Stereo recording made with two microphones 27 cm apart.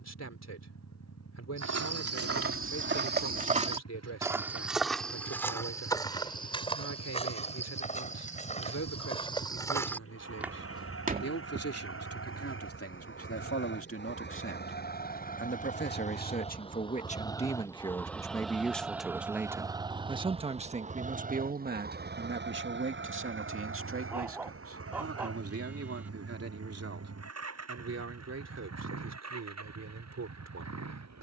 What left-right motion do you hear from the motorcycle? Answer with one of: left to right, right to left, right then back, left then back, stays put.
left to right.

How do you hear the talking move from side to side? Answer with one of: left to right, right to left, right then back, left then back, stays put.
left to right.